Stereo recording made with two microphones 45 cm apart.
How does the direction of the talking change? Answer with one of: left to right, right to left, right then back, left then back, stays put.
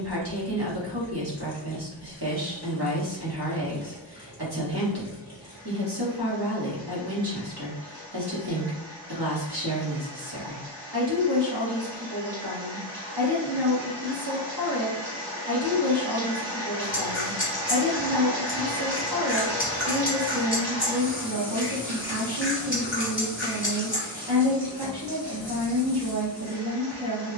stays put.